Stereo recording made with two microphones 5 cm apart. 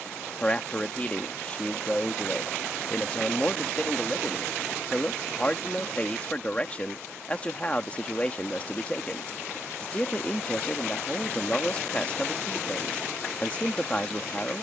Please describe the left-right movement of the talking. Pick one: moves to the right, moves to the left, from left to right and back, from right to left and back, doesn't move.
doesn't move.